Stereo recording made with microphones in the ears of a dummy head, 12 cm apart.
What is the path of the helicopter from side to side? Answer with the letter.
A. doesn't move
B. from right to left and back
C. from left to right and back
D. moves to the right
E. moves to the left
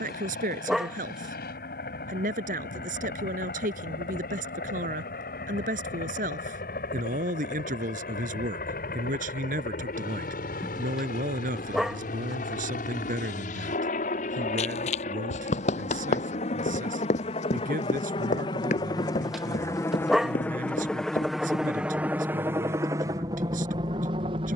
D.